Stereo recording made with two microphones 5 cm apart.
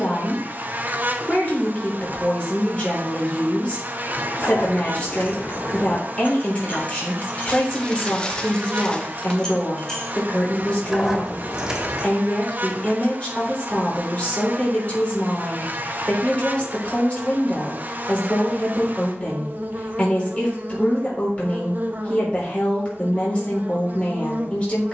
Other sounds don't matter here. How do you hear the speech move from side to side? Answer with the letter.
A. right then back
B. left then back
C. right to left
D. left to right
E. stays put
E.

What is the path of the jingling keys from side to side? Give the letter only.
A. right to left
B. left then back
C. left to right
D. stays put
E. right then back
C.